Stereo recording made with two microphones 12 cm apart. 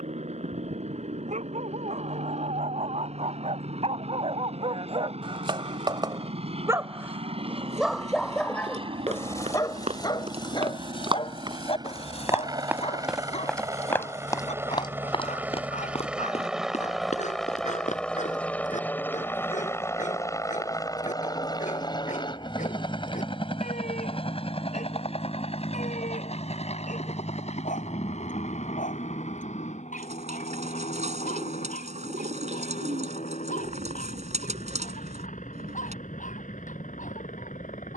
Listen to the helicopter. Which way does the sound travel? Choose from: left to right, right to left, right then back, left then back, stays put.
right to left.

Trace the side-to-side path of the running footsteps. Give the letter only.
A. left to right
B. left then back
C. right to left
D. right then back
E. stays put
C.